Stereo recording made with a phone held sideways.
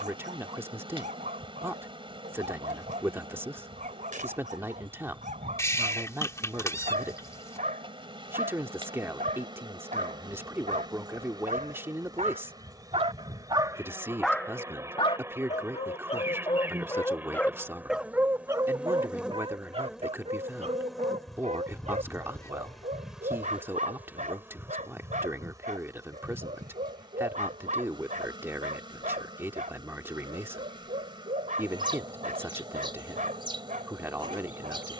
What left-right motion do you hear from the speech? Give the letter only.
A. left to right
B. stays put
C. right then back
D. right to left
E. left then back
B.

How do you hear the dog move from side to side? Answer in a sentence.
In this clip you hear the dog move from right to left and back again.